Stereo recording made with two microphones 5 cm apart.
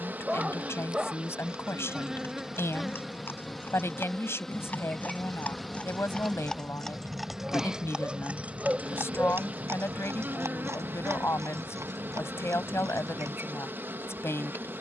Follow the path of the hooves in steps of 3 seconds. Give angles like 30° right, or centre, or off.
50° left, 40° left, 10° right, 60° right, 80° right.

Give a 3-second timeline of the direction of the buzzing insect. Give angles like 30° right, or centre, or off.
20° right, centre, 10° right, 40° right, 40° right.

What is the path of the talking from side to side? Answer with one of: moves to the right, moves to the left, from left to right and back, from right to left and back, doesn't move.
doesn't move.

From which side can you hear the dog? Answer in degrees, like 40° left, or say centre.
20° right.